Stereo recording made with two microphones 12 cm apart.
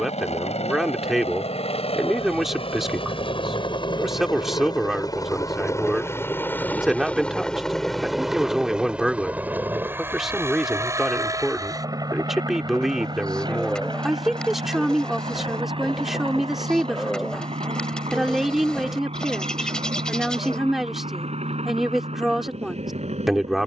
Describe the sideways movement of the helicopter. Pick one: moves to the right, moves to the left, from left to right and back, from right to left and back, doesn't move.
moves to the right.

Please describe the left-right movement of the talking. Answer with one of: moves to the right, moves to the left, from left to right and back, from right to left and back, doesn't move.
doesn't move.